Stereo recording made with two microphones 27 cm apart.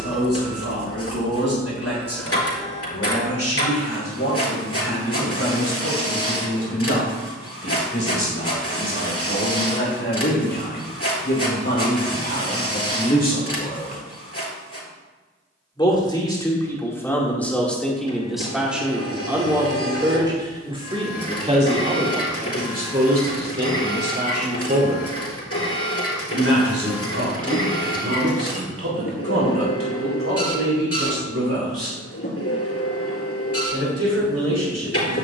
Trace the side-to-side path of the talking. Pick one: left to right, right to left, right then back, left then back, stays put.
left to right.